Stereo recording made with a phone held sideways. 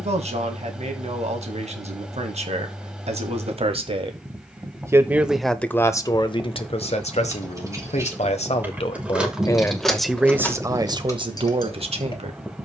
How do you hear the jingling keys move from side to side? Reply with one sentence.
In this clip you hear the jingling keys move to the left.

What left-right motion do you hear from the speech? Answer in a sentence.
In this clip you hear the speech go left and come back.